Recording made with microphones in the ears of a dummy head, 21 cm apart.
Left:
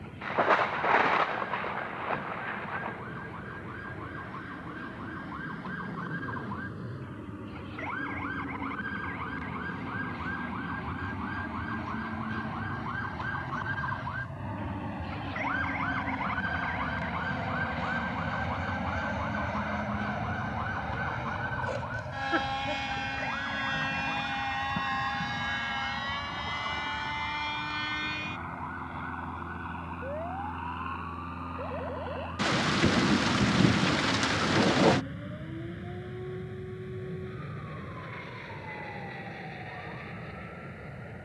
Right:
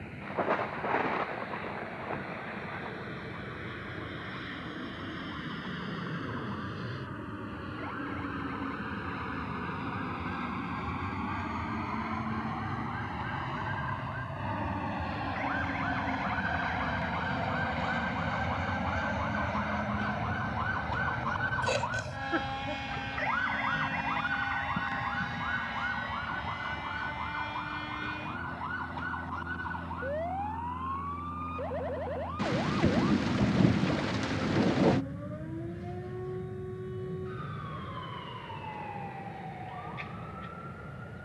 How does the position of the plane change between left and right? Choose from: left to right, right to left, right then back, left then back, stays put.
right to left.